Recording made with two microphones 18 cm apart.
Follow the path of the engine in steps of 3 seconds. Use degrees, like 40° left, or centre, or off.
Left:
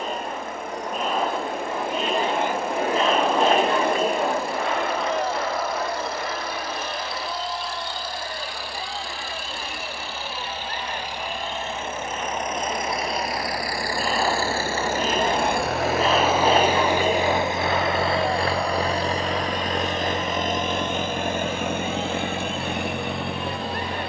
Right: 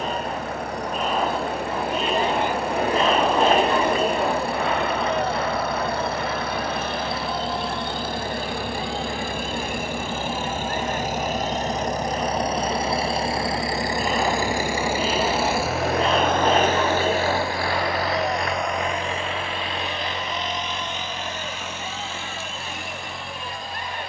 70° right, 60° right, 60° right, 50° right, 30° right, 10° left, 40° left, 60° left.